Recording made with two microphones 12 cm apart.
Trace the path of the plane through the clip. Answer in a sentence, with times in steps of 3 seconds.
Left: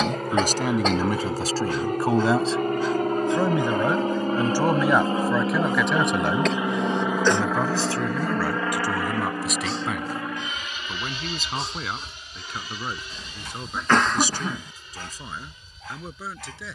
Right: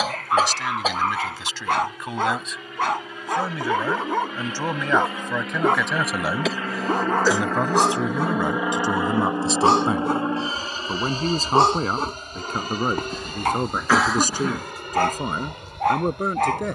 In this clip you hear the plane on the left from 0 s, in the centre from 6 s and on the right from 9 s.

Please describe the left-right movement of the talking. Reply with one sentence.
In this clip you hear the talking move from left to right.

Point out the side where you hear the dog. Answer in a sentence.
You can hear the dog on the right.